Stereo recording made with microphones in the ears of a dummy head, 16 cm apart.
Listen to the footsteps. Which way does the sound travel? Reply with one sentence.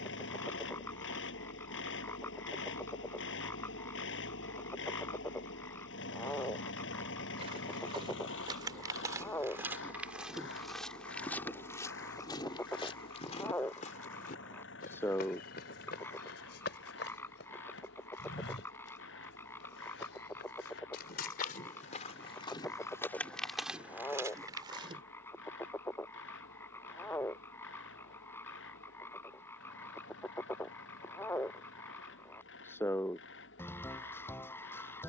In this clip you hear the footsteps go left and come back.